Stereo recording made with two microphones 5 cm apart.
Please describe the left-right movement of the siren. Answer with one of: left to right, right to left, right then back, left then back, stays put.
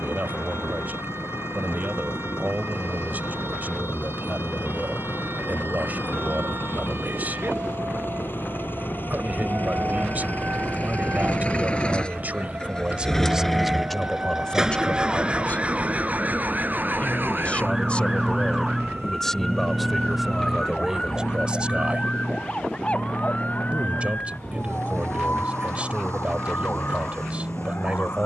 right to left.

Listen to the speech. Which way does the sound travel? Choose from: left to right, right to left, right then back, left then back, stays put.
left then back.